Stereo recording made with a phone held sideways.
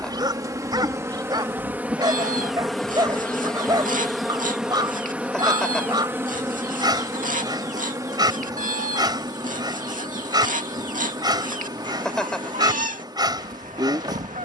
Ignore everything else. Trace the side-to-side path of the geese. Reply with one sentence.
In this clip you hear the geese stay in one place.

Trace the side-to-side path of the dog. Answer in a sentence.
In this clip you hear the dog stay in one place.